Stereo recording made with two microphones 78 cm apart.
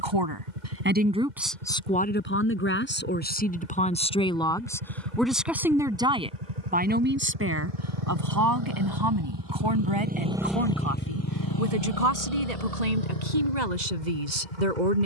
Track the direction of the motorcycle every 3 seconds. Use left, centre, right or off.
right, right, right, centre, left.